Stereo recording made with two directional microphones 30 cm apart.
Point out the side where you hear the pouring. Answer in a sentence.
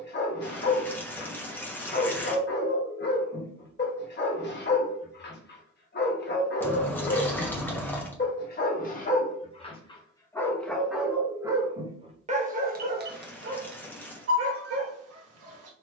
In this clip you hear the pouring in the centre.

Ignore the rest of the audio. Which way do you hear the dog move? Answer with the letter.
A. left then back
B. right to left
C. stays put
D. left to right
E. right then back
D.